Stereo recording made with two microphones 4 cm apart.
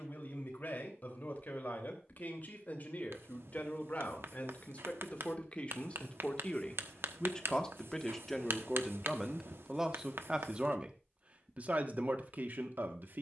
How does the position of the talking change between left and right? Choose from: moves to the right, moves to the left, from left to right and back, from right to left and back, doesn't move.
moves to the right.